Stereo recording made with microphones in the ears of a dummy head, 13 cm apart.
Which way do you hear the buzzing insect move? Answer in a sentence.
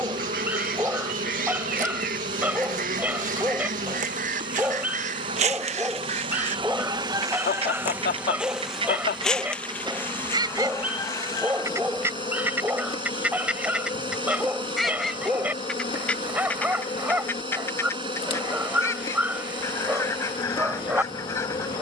In this clip you hear the buzzing insect travel towards the left.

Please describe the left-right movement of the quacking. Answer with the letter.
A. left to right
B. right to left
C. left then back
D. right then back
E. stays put
B.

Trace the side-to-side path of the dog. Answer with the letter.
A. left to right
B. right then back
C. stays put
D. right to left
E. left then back
C.